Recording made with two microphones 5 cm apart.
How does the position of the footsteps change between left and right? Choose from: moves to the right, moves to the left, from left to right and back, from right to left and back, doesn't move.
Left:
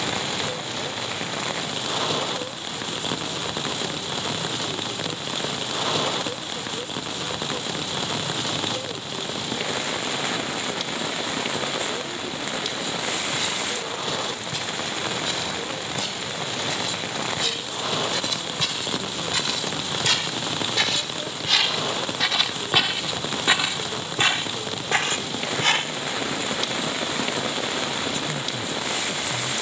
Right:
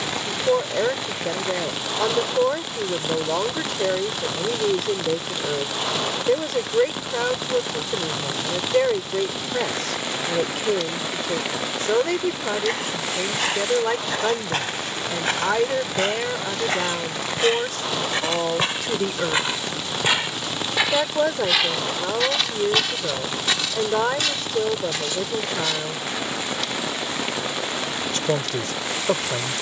moves to the left.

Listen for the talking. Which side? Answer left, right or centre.
right.